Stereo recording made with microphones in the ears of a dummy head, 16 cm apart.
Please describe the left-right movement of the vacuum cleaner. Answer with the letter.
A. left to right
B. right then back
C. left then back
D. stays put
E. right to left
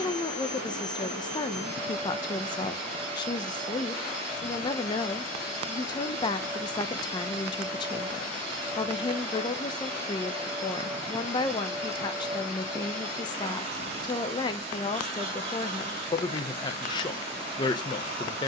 D.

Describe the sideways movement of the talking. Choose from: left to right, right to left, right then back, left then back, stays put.
stays put.